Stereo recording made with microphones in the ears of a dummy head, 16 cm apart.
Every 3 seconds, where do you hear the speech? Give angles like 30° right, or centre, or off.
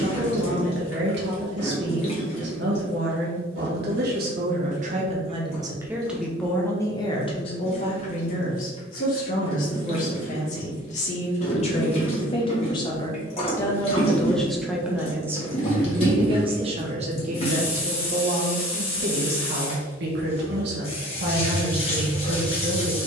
70° right, 50° right, 30° left, 40° left, 10° left, 30° right, 60° right, 60° right.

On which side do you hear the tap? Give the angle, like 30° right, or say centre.
30° left.